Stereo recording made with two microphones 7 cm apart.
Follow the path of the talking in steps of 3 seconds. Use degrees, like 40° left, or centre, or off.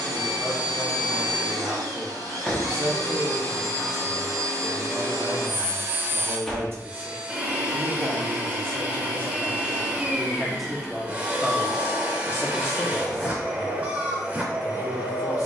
40° right, 40° right, 40° right, centre, 50° left.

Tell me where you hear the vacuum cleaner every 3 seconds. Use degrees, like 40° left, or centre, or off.
60° right, 50° right, 20° right, 20° right, 20° right.